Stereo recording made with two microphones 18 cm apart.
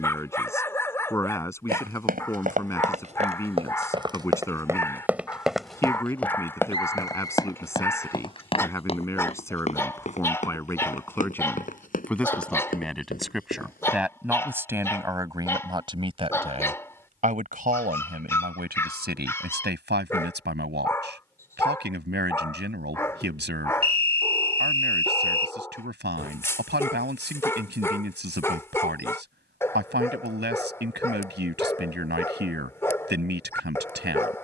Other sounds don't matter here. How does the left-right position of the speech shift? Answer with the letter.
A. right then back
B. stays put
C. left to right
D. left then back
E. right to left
C.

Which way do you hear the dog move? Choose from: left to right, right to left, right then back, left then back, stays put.
stays put.